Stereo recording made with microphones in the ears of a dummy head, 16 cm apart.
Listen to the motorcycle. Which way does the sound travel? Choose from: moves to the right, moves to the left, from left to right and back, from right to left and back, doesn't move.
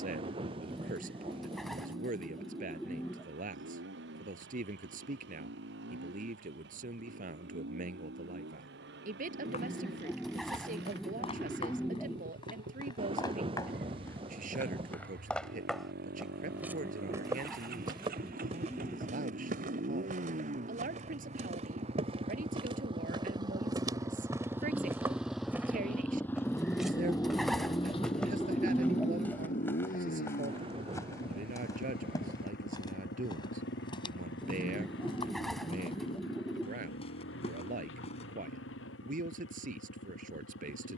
moves to the left.